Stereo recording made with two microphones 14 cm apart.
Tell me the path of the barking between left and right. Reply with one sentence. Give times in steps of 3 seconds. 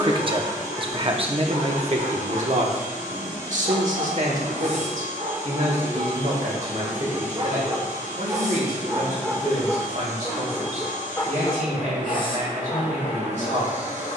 You can hear the barking on the right from 0 s, in the centre from 9 s and on the left from 12 s.